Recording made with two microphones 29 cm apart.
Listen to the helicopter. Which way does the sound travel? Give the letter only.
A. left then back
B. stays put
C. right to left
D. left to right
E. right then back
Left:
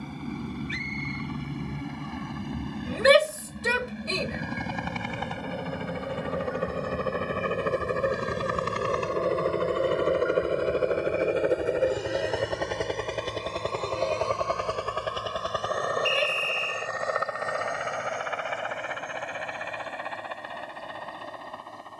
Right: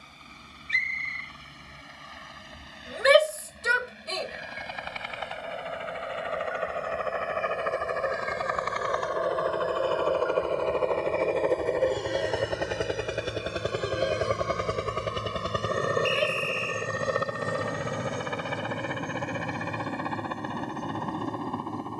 D.